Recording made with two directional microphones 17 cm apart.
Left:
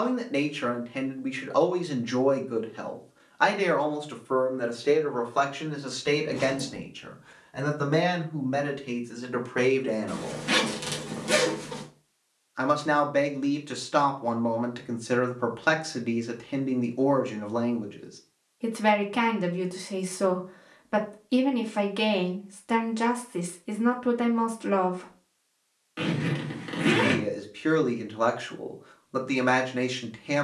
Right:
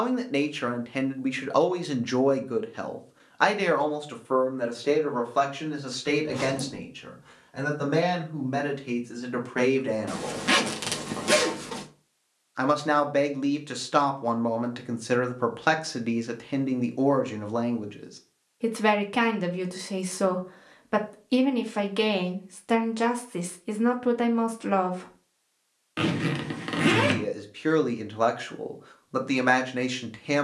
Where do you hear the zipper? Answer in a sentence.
In this clip you hear the zipper on the right.